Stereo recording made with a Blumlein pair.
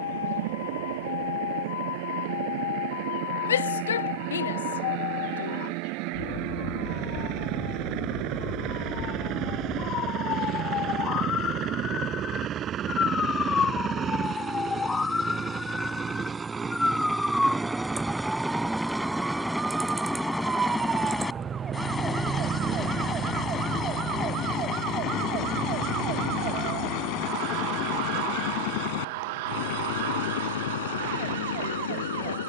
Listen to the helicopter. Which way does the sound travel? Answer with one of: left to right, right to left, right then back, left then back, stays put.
right to left.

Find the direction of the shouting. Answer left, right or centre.
left.